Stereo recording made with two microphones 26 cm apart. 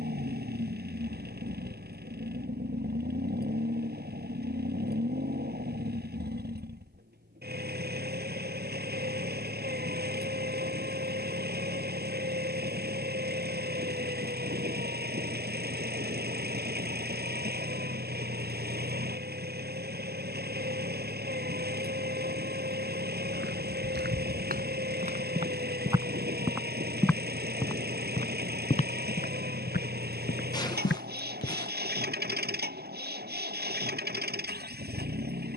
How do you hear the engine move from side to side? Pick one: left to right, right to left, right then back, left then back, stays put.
stays put.